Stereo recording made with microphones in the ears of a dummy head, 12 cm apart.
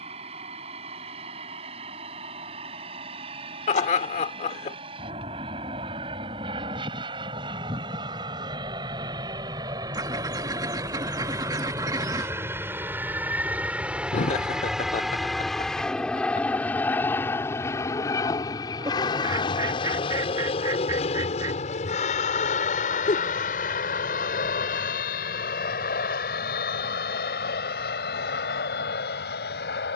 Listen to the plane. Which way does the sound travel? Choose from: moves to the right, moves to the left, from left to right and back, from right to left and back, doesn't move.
moves to the left.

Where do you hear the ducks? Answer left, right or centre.
right.